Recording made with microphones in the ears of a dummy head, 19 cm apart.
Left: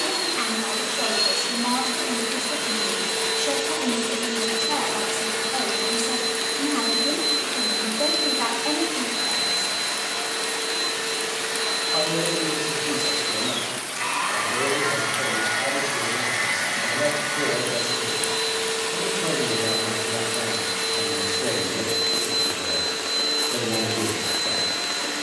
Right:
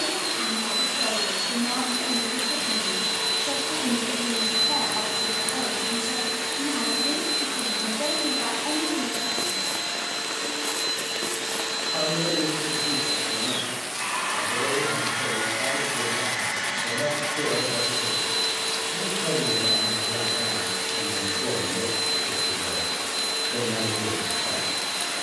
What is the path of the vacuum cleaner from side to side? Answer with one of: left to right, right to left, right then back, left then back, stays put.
stays put.